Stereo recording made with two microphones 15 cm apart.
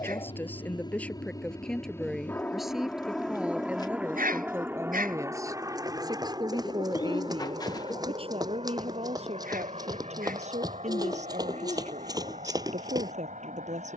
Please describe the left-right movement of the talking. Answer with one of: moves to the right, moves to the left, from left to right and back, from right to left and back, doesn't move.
moves to the right.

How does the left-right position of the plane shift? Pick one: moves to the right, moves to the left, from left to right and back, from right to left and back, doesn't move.
moves to the right.